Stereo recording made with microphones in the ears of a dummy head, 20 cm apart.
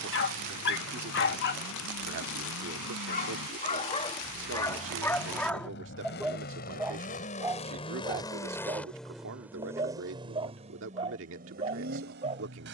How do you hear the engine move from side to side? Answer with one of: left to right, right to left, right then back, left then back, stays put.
left to right.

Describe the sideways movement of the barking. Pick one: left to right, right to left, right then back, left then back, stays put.
left to right.